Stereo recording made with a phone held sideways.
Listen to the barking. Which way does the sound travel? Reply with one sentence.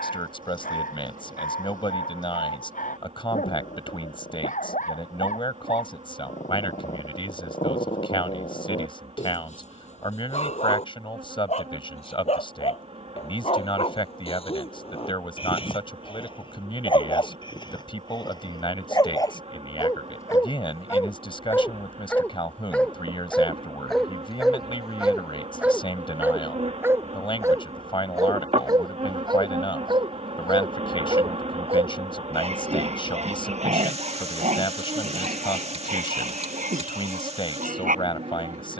In this clip you hear the barking travel towards the right.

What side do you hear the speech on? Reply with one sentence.
In this clip you hear the speech on the left.